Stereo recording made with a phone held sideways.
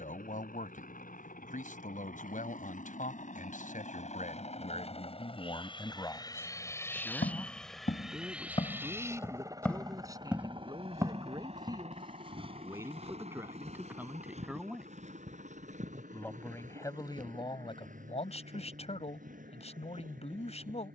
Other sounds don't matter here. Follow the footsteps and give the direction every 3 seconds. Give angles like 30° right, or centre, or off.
off, off, 50° left, 10° right, 40° right, 50° right, 60° right.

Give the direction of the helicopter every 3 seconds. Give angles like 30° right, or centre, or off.
70° left, 50° left, 10° left, 30° right, 50° right, 60° right, 60° right.